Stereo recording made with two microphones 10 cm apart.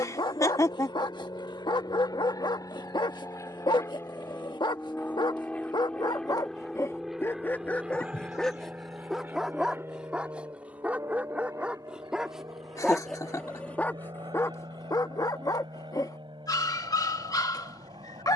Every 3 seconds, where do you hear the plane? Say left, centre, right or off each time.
left, left, centre, right, right, right.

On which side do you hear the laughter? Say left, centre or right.
left.